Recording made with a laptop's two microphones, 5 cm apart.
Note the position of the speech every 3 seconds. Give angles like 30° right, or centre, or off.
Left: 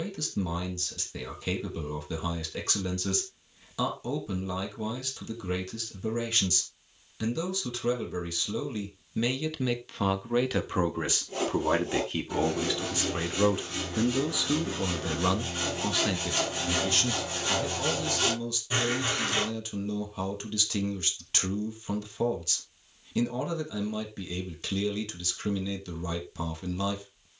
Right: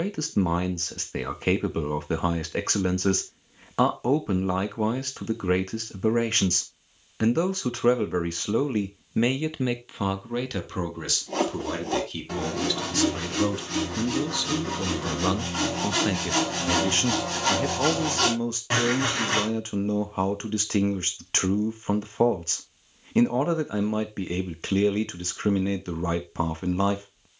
50° right, 50° right, 50° right, centre, 10° left, 20° right, 40° right, 40° right, 40° right.